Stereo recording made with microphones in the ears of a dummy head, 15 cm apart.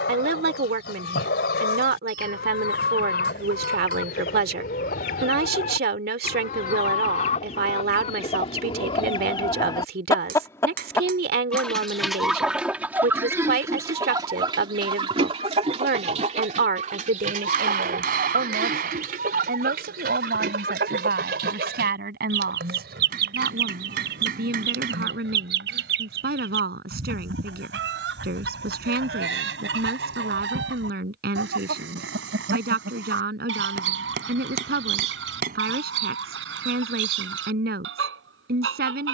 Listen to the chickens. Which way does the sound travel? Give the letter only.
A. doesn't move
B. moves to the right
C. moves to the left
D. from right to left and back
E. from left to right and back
B.